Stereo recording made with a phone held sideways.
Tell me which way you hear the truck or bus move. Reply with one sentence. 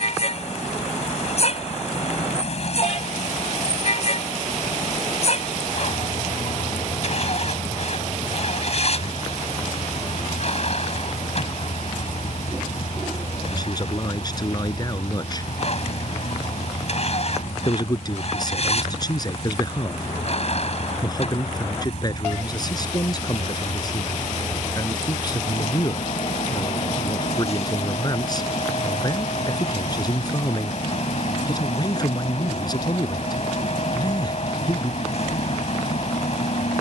In this clip you hear the truck or bus stay put.